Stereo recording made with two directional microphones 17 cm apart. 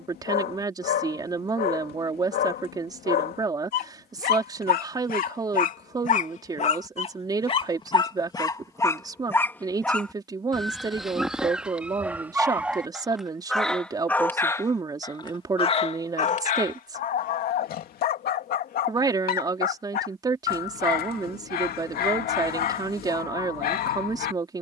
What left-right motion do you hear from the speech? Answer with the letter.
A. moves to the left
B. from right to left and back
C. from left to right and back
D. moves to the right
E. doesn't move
E.